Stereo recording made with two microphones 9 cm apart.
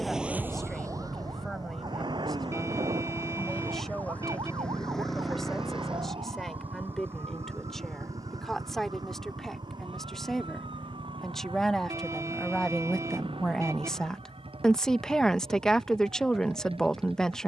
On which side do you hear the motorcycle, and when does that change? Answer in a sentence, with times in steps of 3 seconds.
You can hear the motorcycle on the left from 0 s, in the centre from 3 s and on the right from 6 s.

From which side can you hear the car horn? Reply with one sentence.
You can hear the car horn on the right.